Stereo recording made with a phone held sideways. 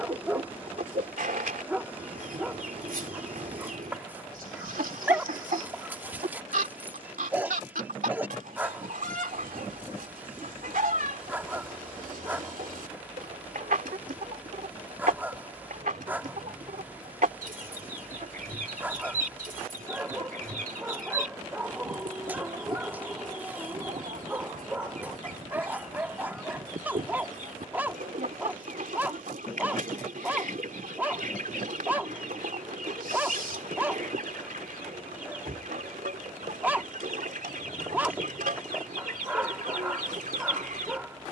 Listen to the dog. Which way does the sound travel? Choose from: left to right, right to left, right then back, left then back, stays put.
stays put.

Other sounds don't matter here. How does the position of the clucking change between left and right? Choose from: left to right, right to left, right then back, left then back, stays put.
stays put.